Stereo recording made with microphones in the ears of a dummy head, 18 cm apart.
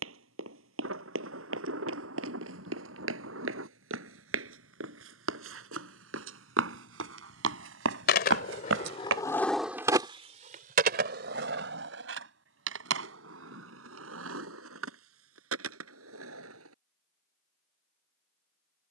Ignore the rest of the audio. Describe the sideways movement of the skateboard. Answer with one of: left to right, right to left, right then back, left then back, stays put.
left to right.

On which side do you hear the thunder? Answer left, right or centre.
right.